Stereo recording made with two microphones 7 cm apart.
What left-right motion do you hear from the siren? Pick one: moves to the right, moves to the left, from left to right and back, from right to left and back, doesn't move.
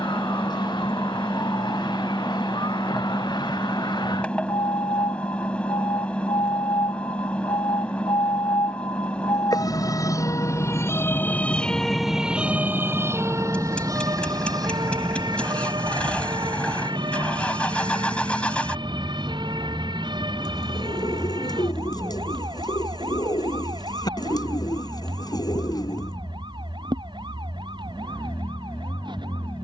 moves to the right.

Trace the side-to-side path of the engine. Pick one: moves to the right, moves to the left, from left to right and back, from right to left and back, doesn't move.
doesn't move.